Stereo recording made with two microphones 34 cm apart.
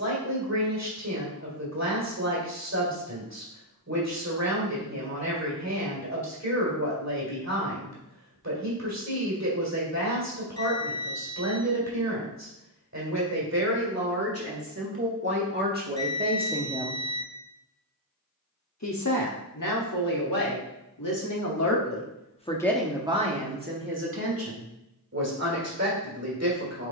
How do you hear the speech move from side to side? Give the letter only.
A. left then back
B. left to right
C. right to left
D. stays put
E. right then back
A.